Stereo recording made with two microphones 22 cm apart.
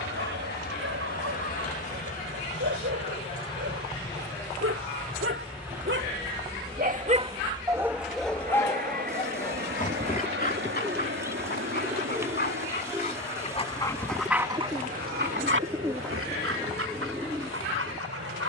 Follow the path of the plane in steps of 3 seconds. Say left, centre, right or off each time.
left, centre, right, right, right, right.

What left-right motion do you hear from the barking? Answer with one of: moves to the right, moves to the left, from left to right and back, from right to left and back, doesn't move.
from right to left and back.